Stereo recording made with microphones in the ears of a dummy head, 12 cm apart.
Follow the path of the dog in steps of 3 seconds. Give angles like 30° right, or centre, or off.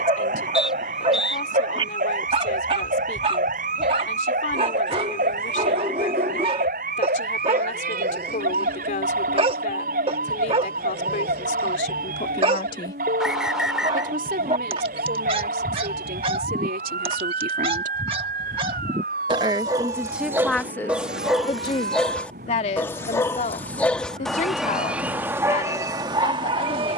40° right, 40° right, 40° right, 40° right, 40° right, 40° right, 30° right, 10° left, 20° right.